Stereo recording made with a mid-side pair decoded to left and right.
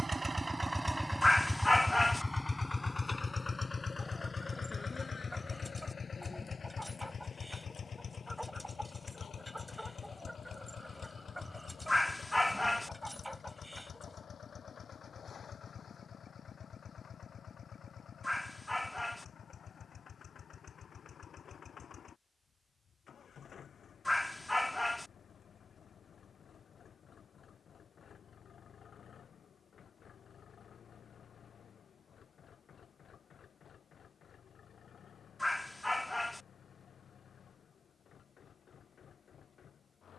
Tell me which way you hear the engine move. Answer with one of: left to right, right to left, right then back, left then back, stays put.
right to left.